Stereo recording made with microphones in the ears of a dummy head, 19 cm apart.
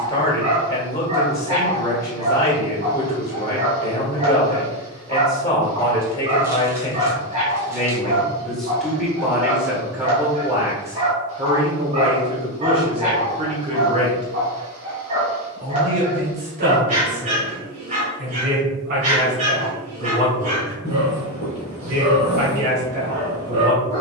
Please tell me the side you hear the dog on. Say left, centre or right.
right.